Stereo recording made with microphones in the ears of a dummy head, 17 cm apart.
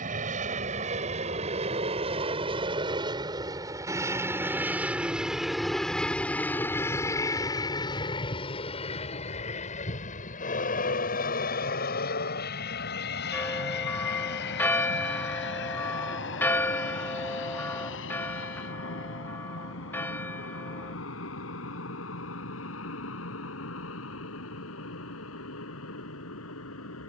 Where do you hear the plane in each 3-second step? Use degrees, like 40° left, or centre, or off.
40° right, 10° right, 20° left, 40° left, 60° left, 60° left, 70° left, 70° left, 80° left.